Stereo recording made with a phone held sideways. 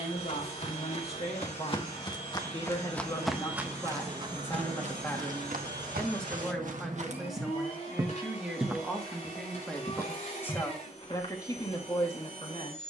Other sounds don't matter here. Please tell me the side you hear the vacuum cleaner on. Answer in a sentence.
In this clip you hear the vacuum cleaner on the left.